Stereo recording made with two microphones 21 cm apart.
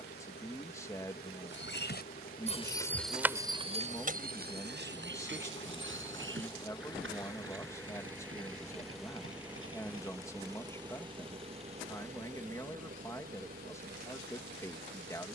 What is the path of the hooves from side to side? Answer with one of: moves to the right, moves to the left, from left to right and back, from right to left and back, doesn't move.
moves to the right.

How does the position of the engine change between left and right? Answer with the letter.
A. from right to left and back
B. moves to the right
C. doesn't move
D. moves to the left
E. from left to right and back
B.